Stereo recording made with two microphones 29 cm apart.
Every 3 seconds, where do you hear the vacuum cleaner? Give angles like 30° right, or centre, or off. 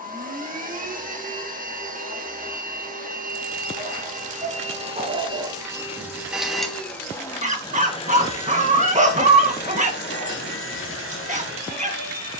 30° right, 20° right, 10° left, 40° left.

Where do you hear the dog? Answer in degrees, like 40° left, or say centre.
30° right.